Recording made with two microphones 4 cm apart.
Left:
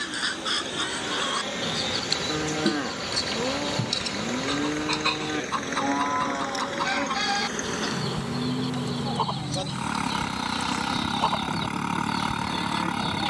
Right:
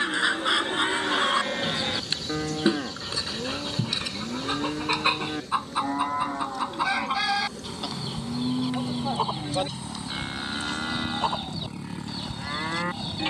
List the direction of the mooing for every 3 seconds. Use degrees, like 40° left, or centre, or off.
20° right, 20° left, 10° right, 30° right, 40° right.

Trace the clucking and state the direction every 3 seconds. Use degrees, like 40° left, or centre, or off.
20° right, 20° right, 10° right, centre, 10° left.